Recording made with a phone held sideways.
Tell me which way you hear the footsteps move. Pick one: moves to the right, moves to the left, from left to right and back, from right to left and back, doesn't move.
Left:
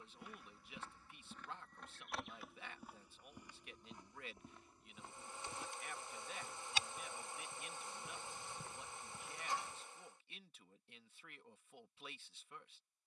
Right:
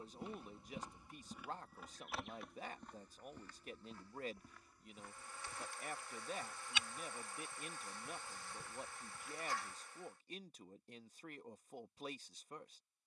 moves to the left.